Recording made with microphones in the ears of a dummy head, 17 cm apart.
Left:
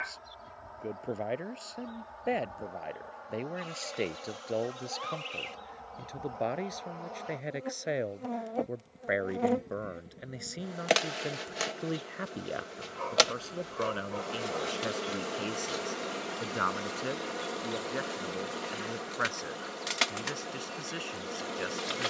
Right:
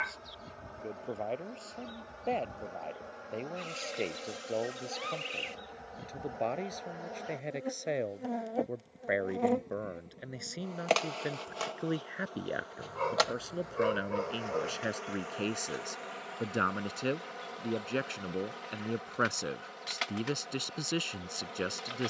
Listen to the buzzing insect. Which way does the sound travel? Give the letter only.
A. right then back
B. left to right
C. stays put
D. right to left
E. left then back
D.